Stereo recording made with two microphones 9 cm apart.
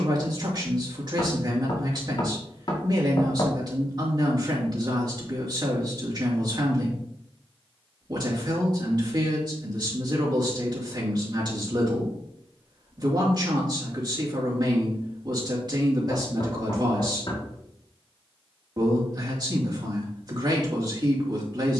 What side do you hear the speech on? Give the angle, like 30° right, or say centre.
50° right.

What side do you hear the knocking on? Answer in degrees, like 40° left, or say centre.
50° left.